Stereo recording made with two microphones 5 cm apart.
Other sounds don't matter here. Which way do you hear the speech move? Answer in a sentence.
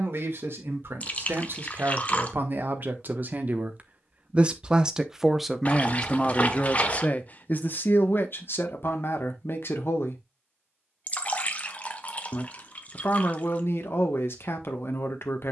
You can hear the speech move from right to left.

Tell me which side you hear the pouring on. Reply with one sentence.
In this clip you hear the pouring on the left.